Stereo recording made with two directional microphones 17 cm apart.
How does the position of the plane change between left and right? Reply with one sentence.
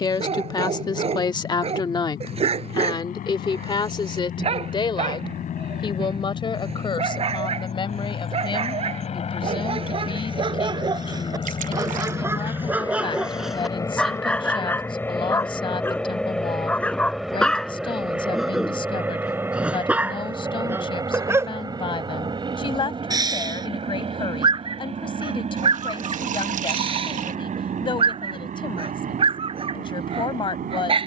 In this clip you hear the plane move to the right.